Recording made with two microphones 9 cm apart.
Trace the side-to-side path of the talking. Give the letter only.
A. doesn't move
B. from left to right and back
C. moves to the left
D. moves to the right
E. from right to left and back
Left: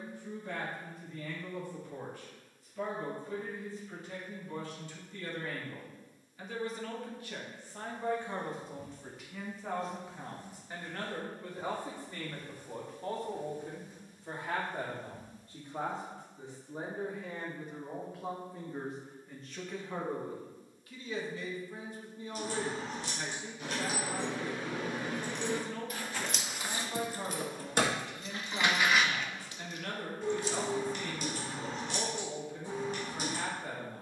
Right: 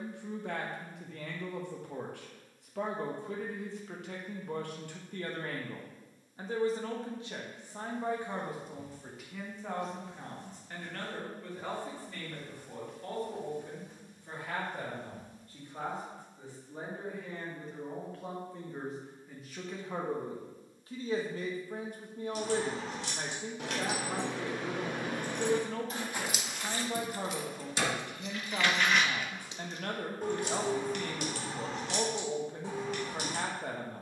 E.